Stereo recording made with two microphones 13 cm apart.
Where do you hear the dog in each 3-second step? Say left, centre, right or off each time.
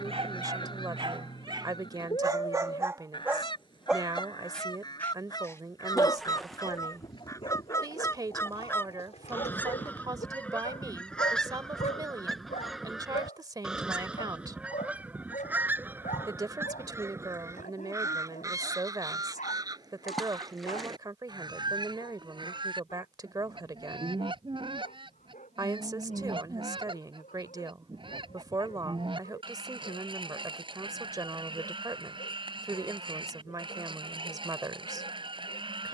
right, centre, left, left, left, left, left, left, left, left, left, left.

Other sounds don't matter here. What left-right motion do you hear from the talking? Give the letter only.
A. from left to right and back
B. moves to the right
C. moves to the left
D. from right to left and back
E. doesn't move
E.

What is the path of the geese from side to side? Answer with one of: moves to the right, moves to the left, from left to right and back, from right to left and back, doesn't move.
moves to the right.